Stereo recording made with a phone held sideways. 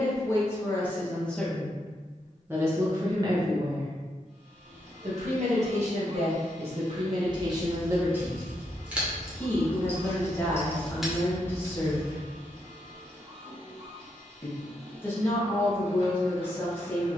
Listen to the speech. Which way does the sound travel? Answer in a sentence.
You can hear the speech move from left to right and back again.